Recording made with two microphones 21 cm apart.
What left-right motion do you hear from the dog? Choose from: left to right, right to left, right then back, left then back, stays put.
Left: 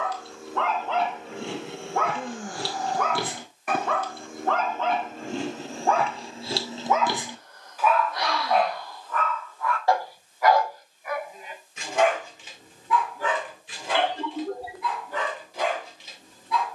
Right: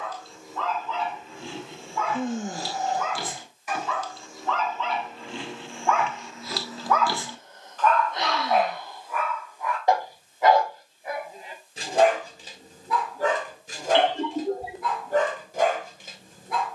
left to right.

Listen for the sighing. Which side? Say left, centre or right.
right.